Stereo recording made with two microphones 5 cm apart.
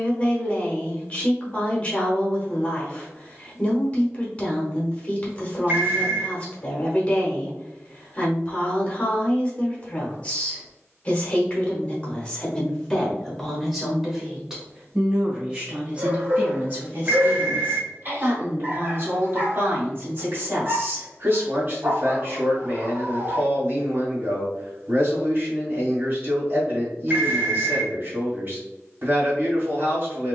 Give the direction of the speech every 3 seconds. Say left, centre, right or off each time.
left, left, left, left, centre, right, right, right, right, right.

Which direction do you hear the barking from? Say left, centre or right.
right.